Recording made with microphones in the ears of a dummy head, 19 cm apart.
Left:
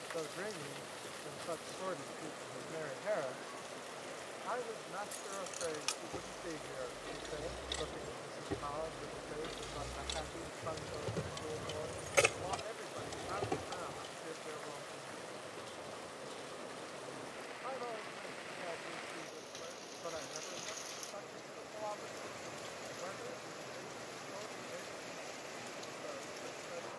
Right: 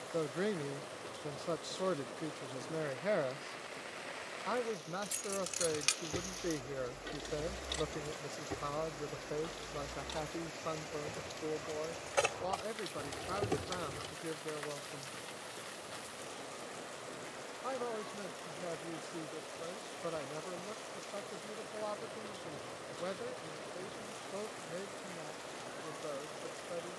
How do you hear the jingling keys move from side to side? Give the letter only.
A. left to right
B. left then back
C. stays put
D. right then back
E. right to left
B.